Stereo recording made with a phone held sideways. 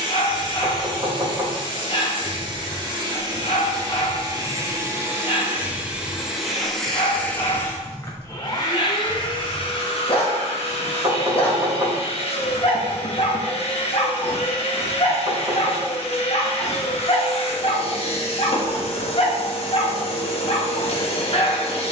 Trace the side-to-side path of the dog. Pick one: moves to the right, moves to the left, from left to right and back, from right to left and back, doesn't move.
doesn't move.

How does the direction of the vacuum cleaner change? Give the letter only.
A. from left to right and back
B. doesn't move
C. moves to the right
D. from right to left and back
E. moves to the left
E.